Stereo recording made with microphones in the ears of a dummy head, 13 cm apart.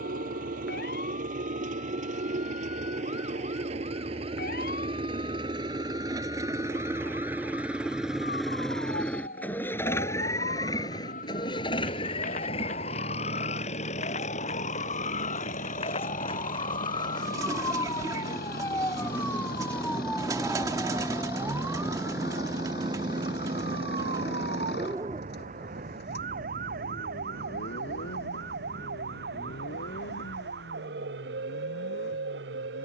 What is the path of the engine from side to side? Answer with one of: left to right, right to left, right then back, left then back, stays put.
right to left.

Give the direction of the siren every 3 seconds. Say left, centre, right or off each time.
left, left, left, left, left, left, centre, right, right, right, right.